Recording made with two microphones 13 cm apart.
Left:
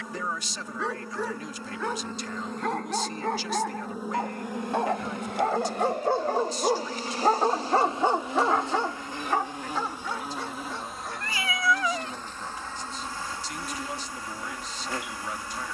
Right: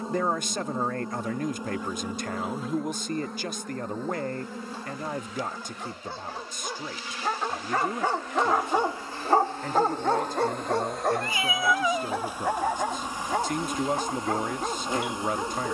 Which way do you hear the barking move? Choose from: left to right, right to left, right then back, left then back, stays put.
left to right.